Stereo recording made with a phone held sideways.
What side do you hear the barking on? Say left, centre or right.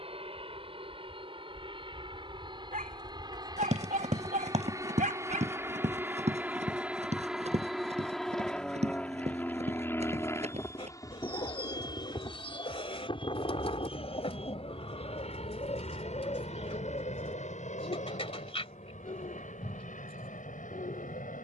right.